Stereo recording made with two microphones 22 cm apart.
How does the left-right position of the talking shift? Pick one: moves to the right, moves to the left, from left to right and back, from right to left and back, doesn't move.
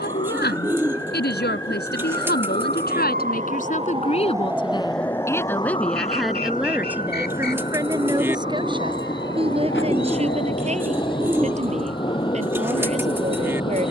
moves to the right.